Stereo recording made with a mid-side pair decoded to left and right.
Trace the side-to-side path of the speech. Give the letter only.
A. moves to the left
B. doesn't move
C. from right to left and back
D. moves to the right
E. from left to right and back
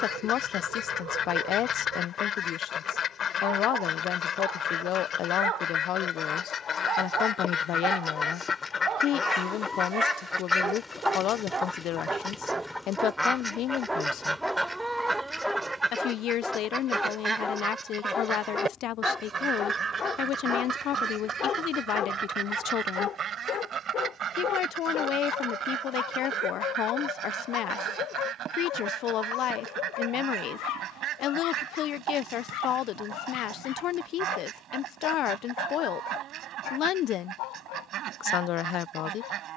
B.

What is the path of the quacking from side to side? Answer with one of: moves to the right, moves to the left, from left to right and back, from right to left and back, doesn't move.
moves to the right.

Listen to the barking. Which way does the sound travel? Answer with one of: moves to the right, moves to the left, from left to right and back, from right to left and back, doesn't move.
moves to the left.